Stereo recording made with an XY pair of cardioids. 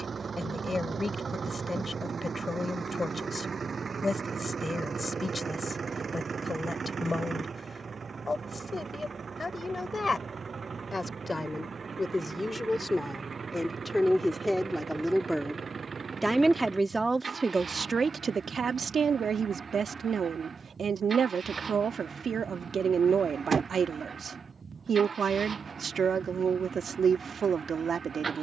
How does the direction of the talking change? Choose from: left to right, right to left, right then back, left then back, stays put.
left to right.